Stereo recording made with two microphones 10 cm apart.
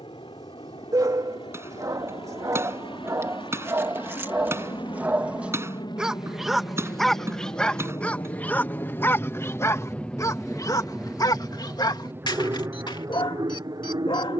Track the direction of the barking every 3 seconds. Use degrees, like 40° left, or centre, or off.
40° right, 20° right, 10° left, 30° left, 50° left.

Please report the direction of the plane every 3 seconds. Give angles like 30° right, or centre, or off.
70° left, 60° left, 40° left, centre, 30° right.